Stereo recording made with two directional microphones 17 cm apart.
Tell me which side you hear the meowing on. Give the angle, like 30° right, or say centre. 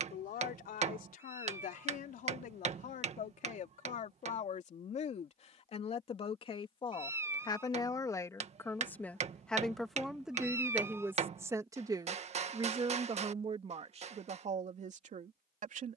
20° right.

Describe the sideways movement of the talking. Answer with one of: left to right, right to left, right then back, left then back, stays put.
left to right.